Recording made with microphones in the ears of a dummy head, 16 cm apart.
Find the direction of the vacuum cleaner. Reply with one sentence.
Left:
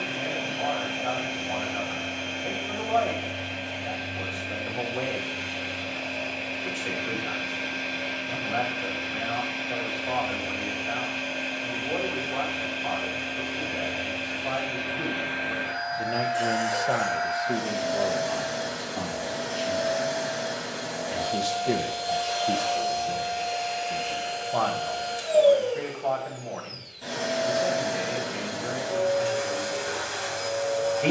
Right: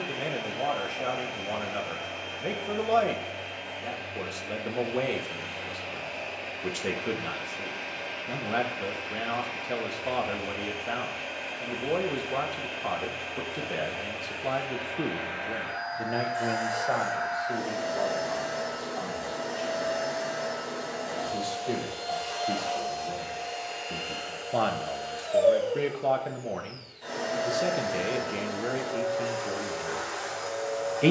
In this clip you hear the vacuum cleaner on the left.